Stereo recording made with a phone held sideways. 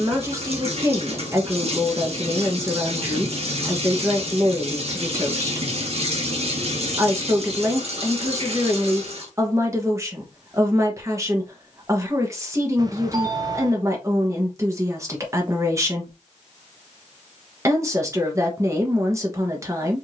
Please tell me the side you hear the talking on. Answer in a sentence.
You can hear the talking on the right.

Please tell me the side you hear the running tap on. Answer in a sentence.
You can hear the running tap on the right.